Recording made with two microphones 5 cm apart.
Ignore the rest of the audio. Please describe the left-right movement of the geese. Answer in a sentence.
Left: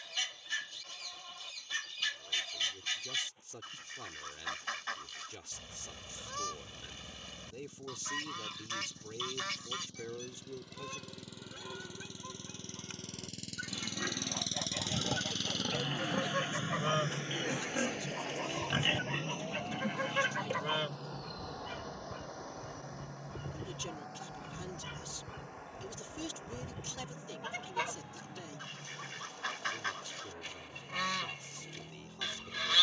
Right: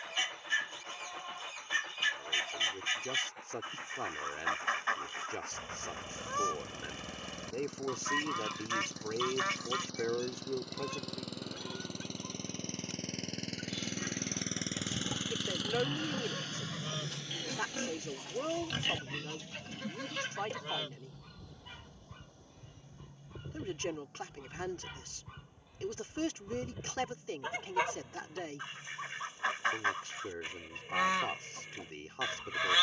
You can hear the geese move from right to left and back again.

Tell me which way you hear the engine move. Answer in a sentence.
You can hear the engine go from the right side to the left.